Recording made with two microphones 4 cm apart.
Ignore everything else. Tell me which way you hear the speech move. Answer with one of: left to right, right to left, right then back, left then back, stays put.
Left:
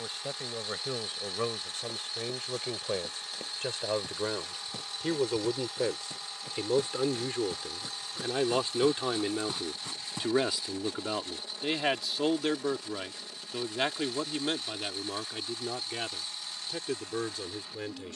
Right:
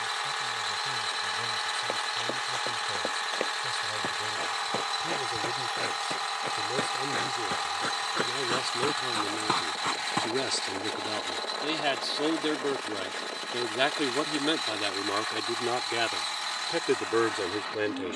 left to right.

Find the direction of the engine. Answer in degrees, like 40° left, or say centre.
70° right.